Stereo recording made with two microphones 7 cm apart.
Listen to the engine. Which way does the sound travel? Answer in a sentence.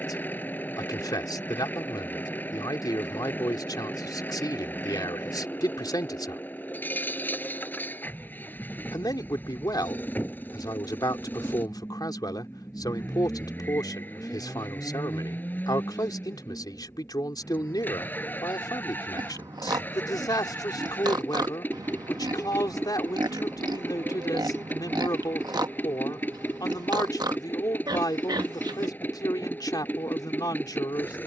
In this clip you hear the engine stay put.